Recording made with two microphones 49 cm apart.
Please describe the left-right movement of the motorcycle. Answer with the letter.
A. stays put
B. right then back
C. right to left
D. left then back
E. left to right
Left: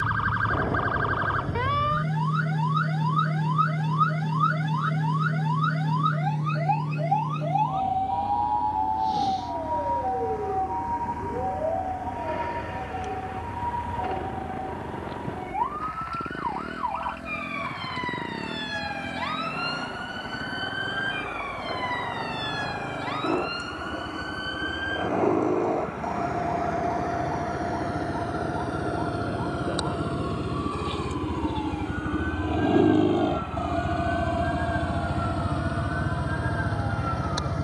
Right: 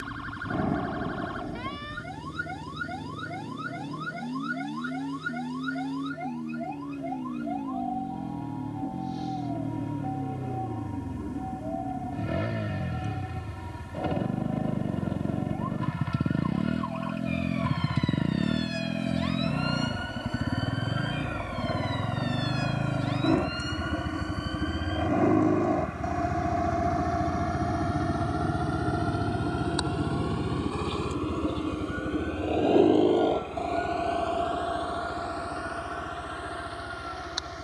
C.